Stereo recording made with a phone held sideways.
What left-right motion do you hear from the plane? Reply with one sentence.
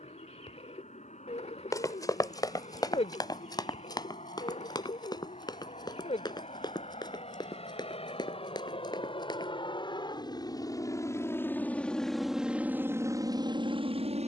In this clip you hear the plane go from the left side to the right.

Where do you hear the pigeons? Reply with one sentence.
You can hear the pigeons on the left.